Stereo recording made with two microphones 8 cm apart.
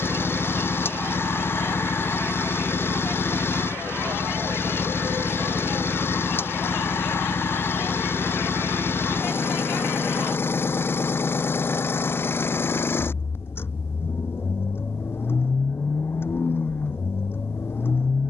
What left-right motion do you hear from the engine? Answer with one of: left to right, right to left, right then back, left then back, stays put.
stays put.